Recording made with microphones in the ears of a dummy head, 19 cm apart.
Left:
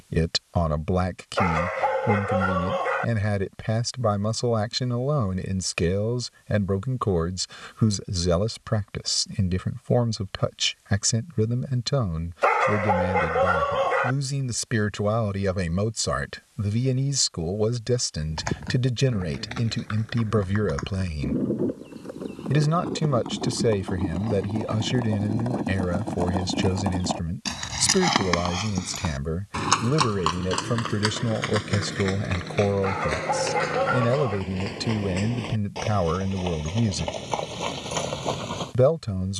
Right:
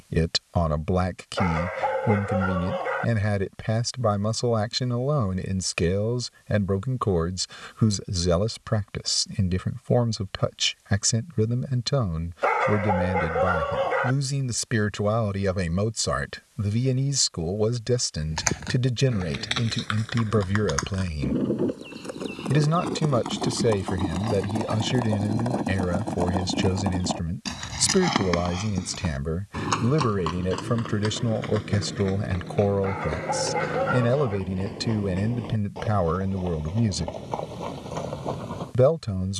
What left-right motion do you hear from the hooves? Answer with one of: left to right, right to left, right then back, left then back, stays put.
right to left.